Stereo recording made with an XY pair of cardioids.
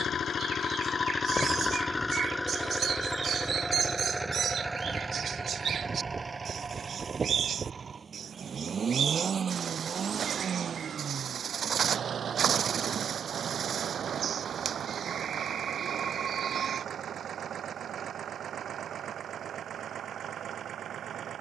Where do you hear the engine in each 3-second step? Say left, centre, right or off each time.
left, centre, right, right, right, right, right.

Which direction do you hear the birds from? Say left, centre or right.
right.